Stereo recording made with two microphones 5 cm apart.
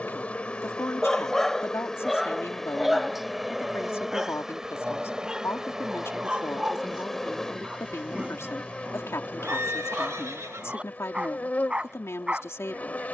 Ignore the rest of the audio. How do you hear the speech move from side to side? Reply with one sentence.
In this clip you hear the speech stay put.